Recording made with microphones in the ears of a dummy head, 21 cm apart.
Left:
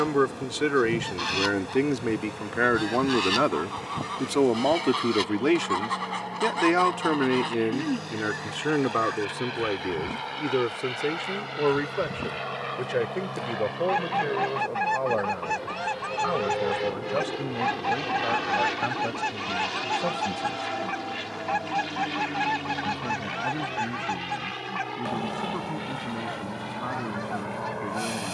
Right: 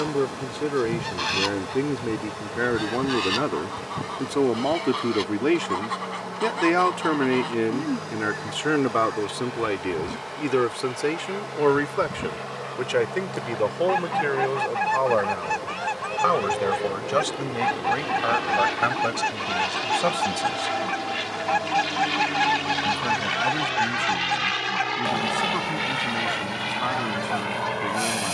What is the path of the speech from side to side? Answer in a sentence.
You can hear the speech move from left to right.